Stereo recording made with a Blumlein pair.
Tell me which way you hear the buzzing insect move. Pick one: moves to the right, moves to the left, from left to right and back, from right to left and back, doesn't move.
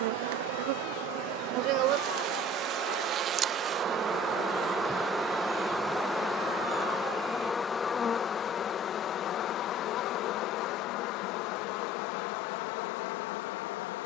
moves to the left.